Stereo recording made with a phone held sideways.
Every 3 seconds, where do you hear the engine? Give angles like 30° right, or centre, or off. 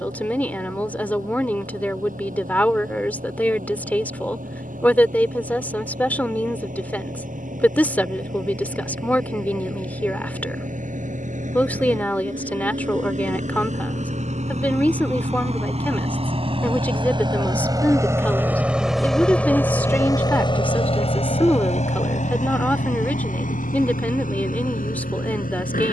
70° right, 70° right, 70° right, 70° right, 60° right, 40° right, 10° left, 60° left, 80° left.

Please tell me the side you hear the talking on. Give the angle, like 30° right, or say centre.
10° left.